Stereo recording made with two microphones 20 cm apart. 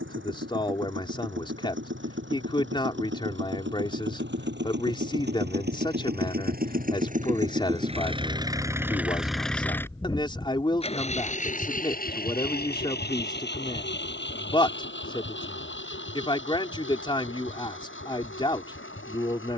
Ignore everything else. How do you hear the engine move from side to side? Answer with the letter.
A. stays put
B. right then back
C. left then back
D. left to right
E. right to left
E.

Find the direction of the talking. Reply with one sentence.
In this clip you hear the talking on the left.